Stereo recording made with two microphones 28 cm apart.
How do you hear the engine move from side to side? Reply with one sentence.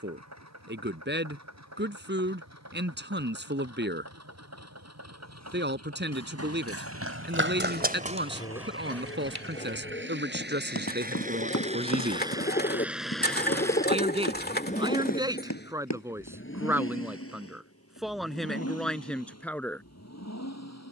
In this clip you hear the engine move to the left.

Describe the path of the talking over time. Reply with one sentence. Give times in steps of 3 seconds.
In this clip you hear the talking on the right from 0 s and in the centre from 15 s.